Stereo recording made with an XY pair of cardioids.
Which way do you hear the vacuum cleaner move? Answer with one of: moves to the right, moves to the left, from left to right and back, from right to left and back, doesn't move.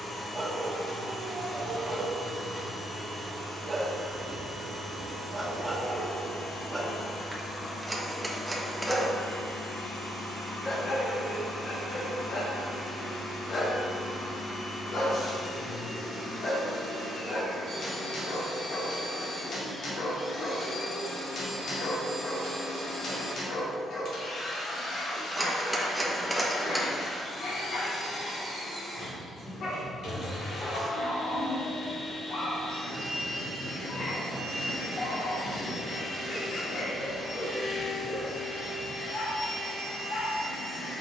doesn't move.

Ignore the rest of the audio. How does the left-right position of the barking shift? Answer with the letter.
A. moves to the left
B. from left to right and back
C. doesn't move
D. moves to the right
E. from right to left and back
A.